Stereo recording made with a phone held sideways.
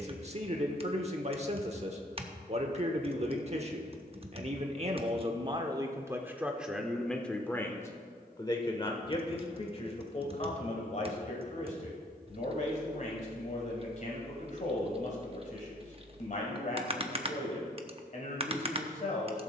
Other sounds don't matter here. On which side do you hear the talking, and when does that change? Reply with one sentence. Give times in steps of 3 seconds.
You can hear the talking on the right from 0 s, in the centre from 6 s and on the left from 9 s.